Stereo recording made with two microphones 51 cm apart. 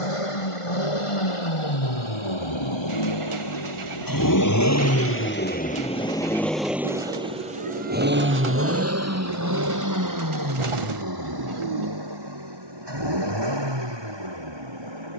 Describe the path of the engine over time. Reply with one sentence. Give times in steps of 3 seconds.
You can hear the engine on the left from 0 s, in the centre from 6 s and on the right from 9 s.